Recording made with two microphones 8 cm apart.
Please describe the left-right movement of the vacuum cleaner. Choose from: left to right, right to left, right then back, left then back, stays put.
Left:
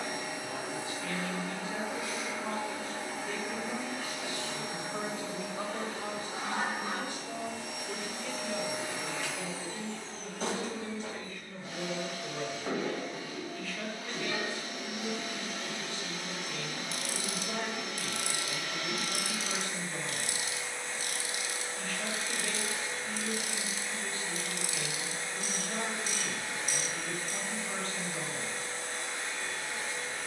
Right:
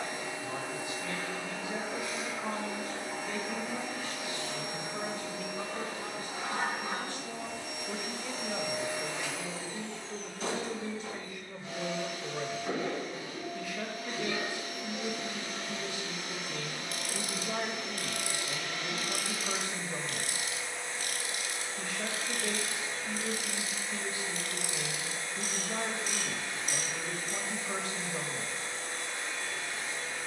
stays put.